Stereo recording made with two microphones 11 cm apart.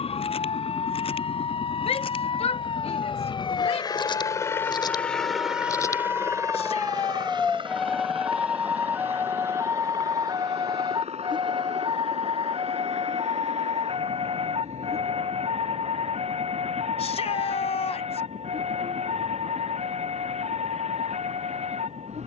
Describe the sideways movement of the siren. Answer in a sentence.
In this clip you hear the siren move to the right.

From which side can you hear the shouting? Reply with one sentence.
In this clip you hear the shouting on the left.